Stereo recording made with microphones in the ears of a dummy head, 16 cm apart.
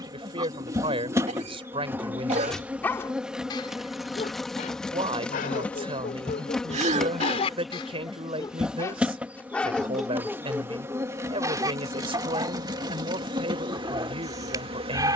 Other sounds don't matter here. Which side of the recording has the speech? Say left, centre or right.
right.